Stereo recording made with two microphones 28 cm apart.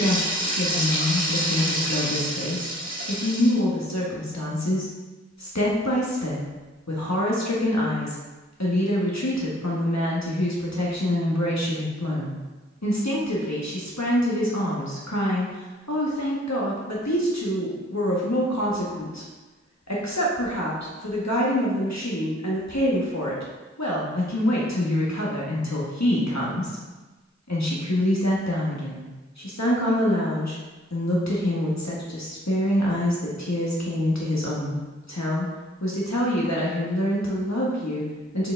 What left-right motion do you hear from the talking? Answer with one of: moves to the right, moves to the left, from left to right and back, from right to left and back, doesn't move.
doesn't move.